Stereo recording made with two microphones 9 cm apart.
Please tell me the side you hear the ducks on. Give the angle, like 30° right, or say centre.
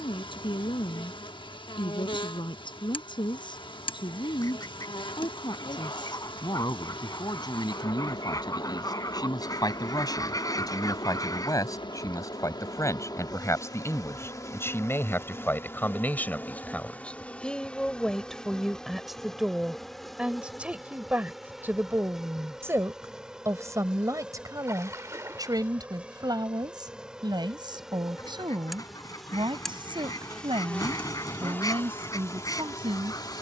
40° left.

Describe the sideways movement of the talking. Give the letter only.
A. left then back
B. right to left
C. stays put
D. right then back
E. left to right
E.